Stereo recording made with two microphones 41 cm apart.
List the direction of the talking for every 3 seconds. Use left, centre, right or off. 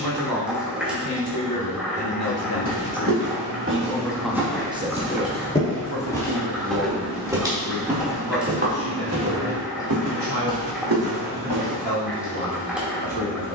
left, centre, right, right, right.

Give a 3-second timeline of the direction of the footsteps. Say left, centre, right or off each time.
right, centre, centre, right, off.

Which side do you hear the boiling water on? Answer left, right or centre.
centre.